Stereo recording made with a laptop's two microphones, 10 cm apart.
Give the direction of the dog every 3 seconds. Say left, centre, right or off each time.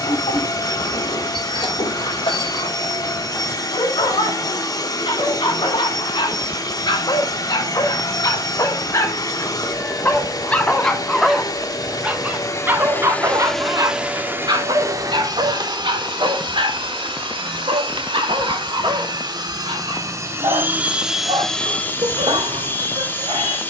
left, left, left, centre, right, right, right, right.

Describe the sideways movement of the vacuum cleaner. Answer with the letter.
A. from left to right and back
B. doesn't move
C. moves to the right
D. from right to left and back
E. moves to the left
A.